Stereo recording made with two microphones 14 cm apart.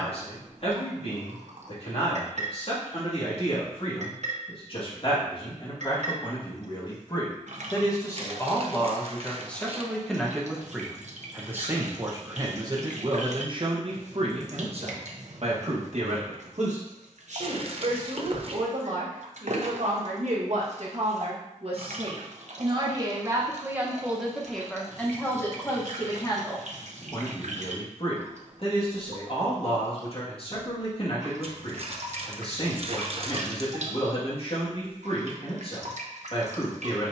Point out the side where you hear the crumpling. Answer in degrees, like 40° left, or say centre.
50° right.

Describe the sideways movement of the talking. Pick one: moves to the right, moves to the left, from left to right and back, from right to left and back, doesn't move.
from left to right and back.